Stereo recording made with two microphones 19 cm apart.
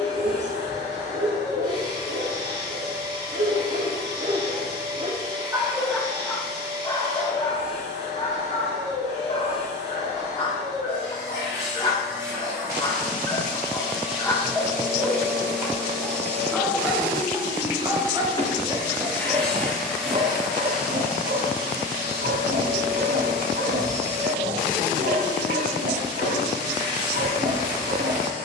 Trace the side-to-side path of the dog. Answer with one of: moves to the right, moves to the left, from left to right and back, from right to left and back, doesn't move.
from right to left and back.